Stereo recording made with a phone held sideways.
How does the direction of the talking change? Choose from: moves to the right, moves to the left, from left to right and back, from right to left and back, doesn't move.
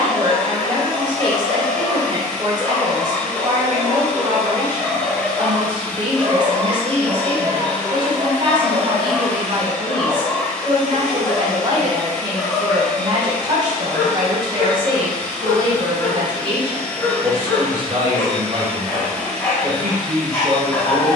doesn't move.